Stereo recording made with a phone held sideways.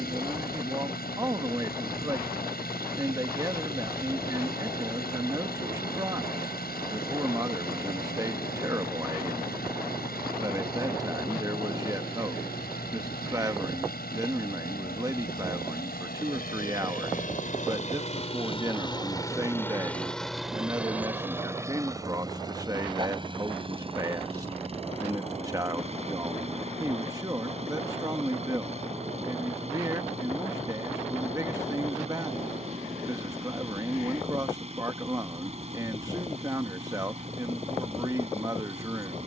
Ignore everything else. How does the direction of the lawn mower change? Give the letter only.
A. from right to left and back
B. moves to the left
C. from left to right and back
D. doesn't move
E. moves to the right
E.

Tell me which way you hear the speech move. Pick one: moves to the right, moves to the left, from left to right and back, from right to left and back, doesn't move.
doesn't move.